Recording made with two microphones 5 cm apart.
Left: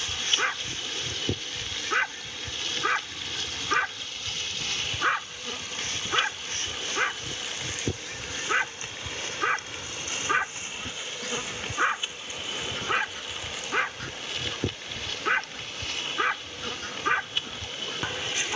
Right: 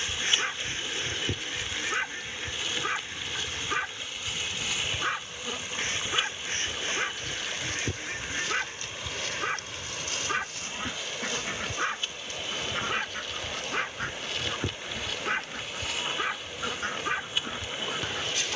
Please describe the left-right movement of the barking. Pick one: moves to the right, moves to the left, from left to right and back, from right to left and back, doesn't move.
doesn't move.